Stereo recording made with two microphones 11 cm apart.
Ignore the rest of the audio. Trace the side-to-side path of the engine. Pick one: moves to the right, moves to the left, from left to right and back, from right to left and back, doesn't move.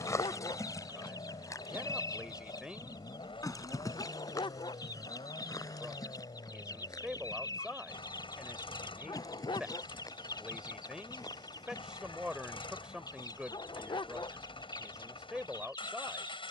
doesn't move.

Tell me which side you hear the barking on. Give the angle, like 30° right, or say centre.
50° left.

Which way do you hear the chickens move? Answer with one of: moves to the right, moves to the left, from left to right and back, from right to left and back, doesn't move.
doesn't move.